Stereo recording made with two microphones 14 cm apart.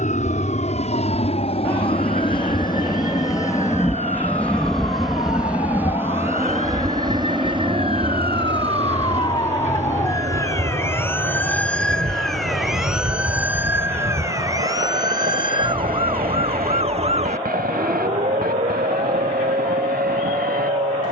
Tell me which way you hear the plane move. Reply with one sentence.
In this clip you hear the plane move from left to right.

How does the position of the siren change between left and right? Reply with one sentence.
In this clip you hear the siren move to the right.